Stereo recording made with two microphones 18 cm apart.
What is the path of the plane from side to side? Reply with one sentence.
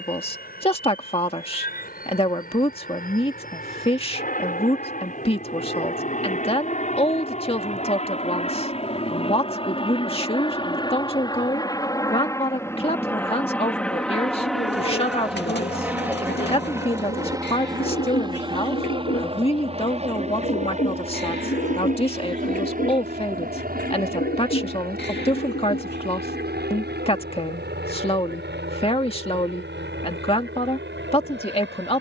You can hear the plane move to the right.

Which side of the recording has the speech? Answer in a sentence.
You can hear the speech on the left.